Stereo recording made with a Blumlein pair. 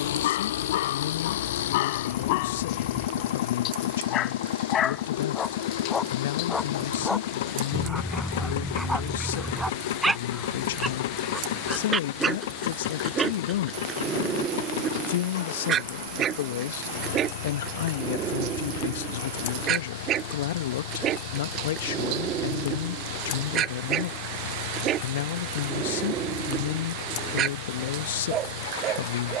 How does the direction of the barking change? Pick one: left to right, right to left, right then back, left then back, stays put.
left to right.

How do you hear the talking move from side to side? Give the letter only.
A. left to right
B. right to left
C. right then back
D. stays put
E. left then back
D.